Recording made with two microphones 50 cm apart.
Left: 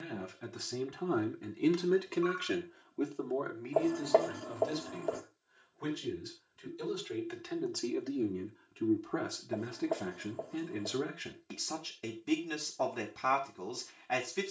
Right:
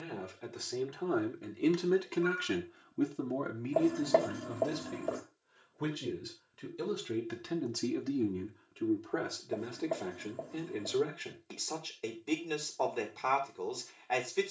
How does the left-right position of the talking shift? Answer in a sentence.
You can hear the talking go right and come back.